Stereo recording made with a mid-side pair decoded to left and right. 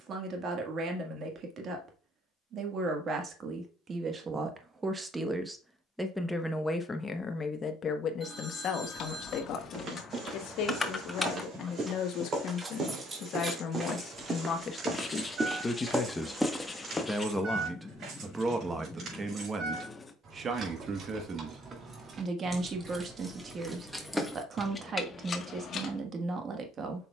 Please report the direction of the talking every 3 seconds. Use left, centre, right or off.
right, right, left, left, left, centre, right, right, right.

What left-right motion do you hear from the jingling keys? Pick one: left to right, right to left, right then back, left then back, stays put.
right then back.